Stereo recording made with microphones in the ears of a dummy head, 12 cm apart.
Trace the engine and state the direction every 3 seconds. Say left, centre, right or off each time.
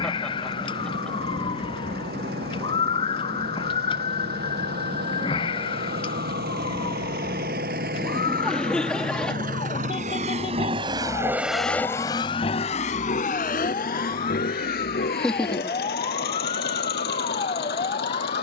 right, right, right, right, left, left.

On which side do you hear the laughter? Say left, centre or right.
centre.